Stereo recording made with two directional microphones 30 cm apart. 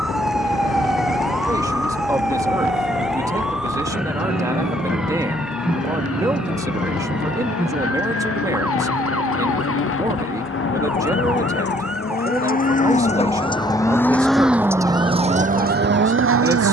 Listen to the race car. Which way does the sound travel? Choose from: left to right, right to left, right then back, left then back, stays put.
left to right.